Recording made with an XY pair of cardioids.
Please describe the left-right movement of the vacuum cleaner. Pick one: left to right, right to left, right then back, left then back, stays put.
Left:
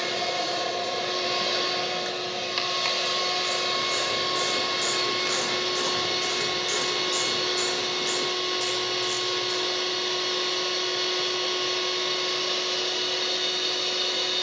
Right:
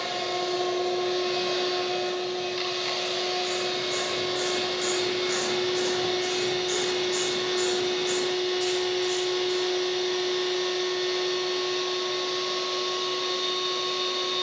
stays put.